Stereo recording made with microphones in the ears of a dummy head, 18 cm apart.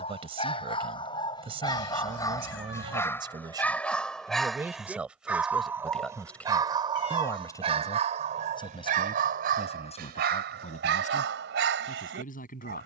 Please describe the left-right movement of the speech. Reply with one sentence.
In this clip you hear the speech go from the right side to the left.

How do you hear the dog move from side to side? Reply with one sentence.
In this clip you hear the dog move from left to right.